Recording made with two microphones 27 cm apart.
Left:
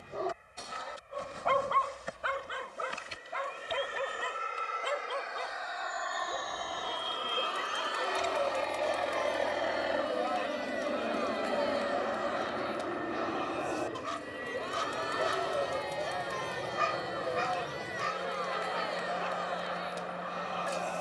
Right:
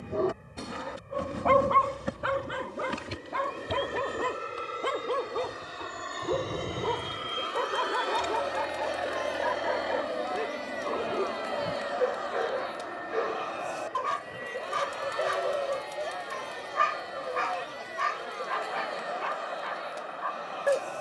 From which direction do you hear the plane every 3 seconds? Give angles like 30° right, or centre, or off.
60° right, 50° right, 20° right, 10° left, 40° left, 50° left, 60° left.